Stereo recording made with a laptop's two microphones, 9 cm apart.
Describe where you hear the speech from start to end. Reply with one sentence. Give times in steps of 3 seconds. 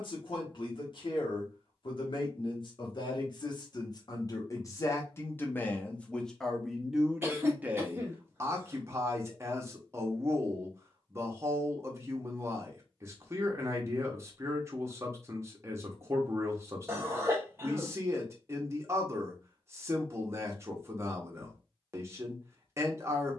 You can hear the speech on the left from 0 s, in the centre from 6 s and on the right from 9 s.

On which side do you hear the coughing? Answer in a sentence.
In this clip you hear the coughing on the right.